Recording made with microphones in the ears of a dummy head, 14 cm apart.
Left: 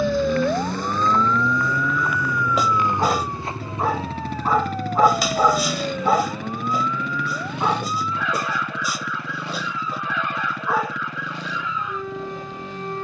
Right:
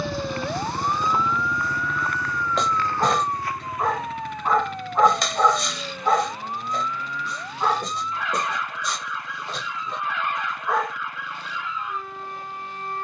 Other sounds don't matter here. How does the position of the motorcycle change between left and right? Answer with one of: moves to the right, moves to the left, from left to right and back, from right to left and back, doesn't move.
moves to the left.